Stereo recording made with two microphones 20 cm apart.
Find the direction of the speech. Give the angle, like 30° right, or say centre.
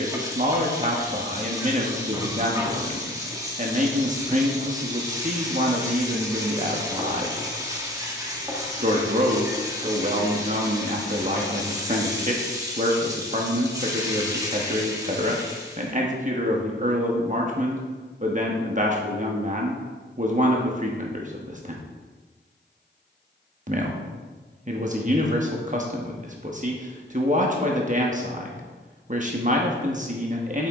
40° right.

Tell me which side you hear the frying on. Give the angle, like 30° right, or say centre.
20° right.